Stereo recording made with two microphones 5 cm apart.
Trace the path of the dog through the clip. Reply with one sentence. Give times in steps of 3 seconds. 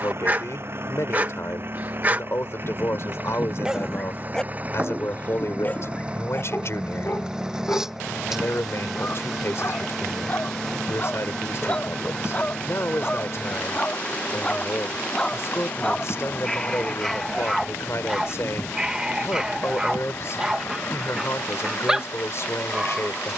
You can hear the dog on the right from 0 s, in the centre from 3 s, on the left from 6 s and in the centre from 15 s.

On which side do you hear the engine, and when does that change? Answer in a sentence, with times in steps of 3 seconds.
You can hear the engine on the right from 0 s, in the centre from 6 s and on the left from 12 s.